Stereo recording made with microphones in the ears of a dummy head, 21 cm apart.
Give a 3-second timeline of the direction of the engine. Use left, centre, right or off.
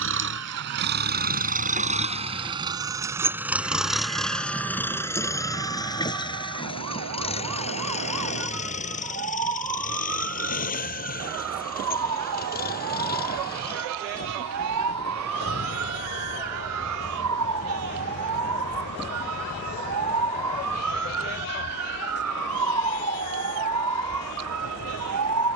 right, centre, left, left, left, left, left, left, left.